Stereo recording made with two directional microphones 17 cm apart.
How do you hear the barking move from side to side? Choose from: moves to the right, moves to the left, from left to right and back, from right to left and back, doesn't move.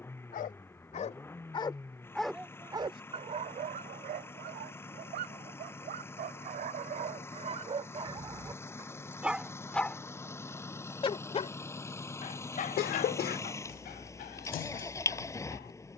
from left to right and back.